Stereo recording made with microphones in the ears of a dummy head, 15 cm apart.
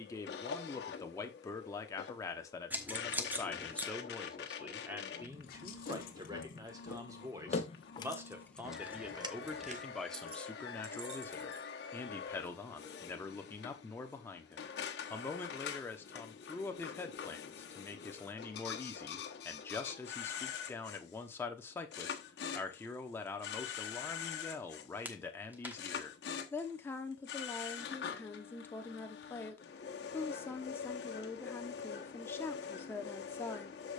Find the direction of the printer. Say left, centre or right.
left.